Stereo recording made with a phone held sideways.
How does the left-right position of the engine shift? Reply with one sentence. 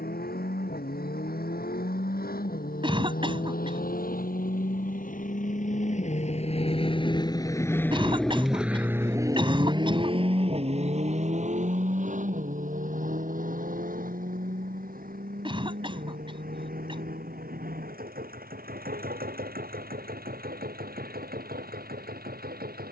You can hear the engine move to the right.